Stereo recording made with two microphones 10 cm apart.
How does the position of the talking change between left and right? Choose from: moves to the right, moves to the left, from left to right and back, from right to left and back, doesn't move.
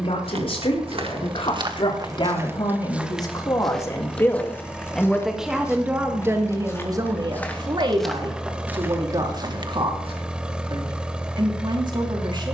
moves to the right.